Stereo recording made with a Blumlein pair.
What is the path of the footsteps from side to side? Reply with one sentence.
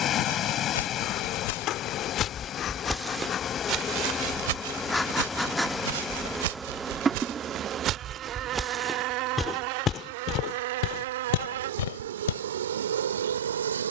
In this clip you hear the footsteps move from left to right and back again.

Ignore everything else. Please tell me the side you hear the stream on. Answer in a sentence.
In this clip you hear the stream on the left.